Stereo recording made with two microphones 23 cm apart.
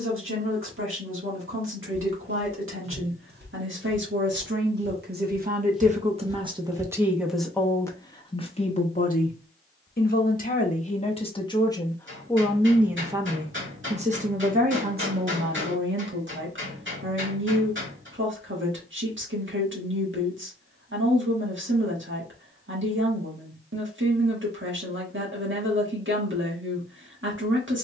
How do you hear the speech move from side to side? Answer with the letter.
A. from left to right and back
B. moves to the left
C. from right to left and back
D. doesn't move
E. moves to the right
C.